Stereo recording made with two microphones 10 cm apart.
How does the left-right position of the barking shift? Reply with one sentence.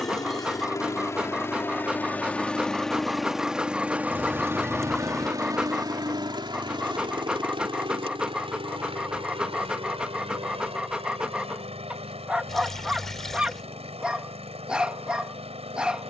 You can hear the barking stay put.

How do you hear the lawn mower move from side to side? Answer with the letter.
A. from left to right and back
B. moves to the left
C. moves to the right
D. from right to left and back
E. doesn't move
C.